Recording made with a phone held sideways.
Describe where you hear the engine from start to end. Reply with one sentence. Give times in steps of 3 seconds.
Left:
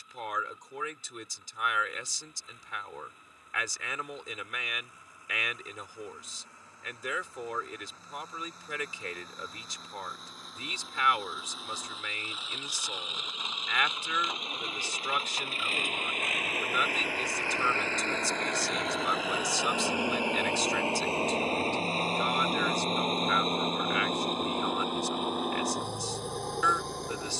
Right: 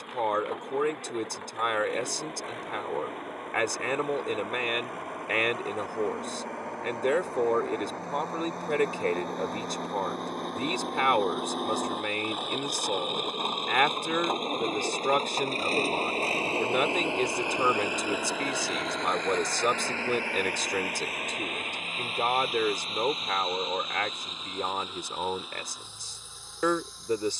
You can hear the engine on the right from 0 s, in the centre from 18 s and on the left from 21 s.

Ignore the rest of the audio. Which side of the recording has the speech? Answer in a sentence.
In this clip you hear the speech on the right.